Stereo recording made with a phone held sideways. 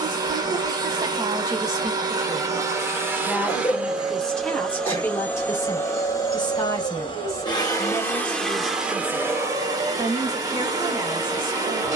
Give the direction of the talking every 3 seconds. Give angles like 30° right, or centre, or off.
30° right, 10° left, 20° left, 20° right.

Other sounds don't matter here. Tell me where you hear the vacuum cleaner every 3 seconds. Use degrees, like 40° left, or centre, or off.
30° right, centre, 20° left, 20° right.